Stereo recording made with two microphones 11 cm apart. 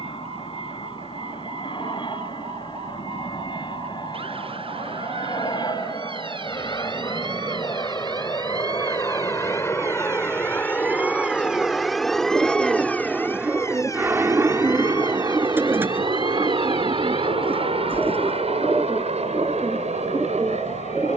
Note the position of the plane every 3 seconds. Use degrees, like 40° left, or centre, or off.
50° left, 50° left, 40° left, 20° left, 10° right, 40° right, 60° right.